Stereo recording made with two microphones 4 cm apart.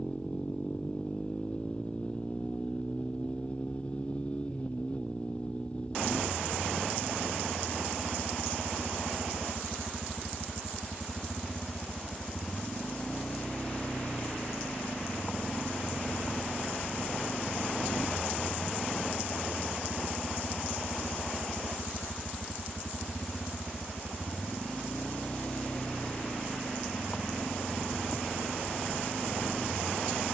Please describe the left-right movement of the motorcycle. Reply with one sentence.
In this clip you hear the motorcycle stay put.